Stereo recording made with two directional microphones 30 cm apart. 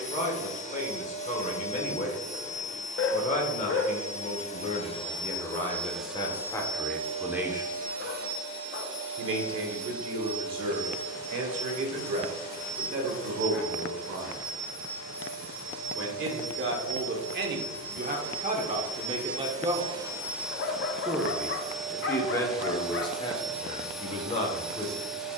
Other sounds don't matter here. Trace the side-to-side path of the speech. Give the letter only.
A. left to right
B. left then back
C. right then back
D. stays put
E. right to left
C.